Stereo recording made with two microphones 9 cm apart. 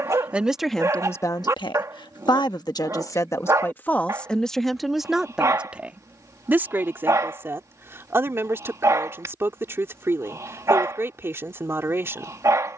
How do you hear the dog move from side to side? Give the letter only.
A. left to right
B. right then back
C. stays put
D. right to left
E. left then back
C.